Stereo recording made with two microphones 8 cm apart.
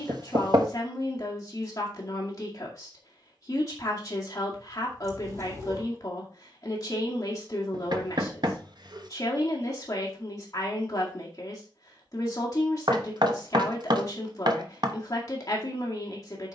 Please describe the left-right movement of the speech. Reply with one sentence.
You can hear the speech stay in one place.